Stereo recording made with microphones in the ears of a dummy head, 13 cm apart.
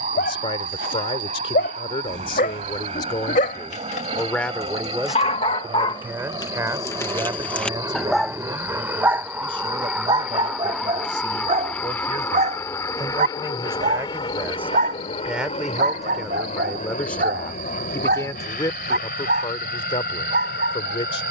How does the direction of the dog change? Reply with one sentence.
In this clip you hear the dog go from the left side to the right.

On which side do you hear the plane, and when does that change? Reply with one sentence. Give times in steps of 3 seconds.
In this clip you hear the plane on the right from 0 s, in the centre from 9 s and on the left from 12 s.